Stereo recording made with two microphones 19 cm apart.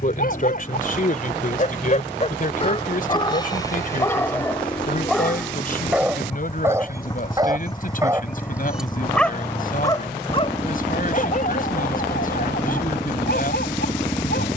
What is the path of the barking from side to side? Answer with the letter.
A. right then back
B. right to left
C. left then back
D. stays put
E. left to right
A.